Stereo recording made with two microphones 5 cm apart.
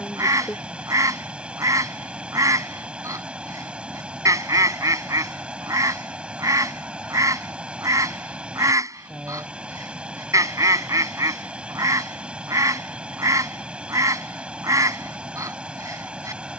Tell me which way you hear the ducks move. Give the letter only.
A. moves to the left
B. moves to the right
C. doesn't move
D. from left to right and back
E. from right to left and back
C.